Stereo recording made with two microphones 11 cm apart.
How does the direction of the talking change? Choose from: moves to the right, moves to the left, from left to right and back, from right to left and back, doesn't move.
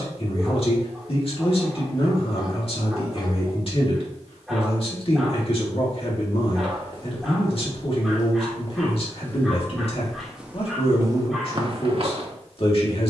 doesn't move.